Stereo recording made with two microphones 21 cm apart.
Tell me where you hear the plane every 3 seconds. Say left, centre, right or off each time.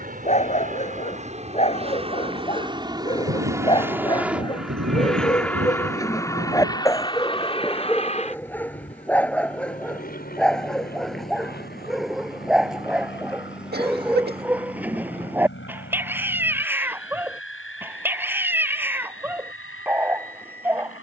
right, centre, left, left, left, left, left.